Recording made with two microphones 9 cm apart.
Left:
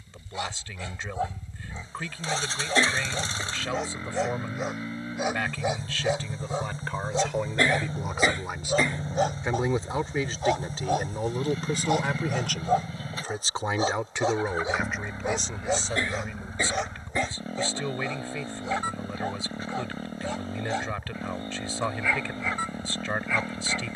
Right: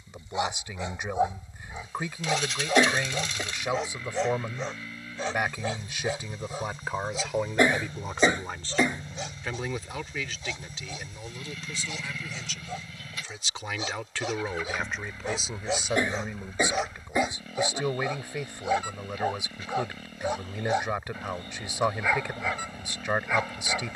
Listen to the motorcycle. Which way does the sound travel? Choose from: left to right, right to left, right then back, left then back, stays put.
stays put.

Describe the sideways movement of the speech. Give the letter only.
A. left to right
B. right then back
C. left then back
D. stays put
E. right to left
C.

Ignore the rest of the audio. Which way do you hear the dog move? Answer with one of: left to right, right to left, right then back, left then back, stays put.
left then back.